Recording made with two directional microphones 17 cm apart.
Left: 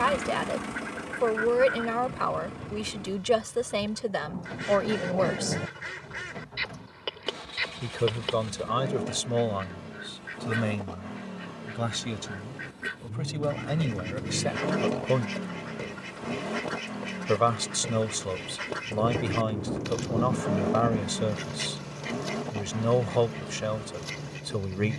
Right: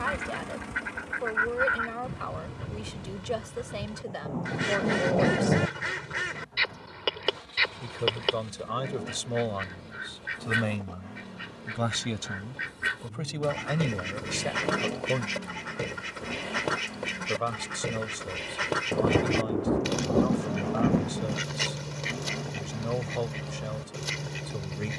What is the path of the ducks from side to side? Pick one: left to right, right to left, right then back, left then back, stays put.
stays put.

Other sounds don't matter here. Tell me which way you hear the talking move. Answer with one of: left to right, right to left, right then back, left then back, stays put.
right then back.